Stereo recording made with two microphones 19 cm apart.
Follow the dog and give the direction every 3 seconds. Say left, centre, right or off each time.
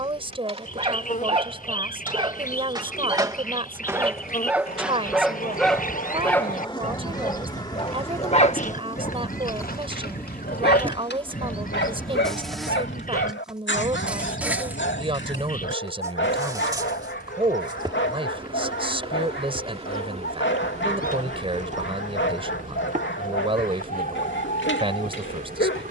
right, centre, left, left, left, left, left, left, left.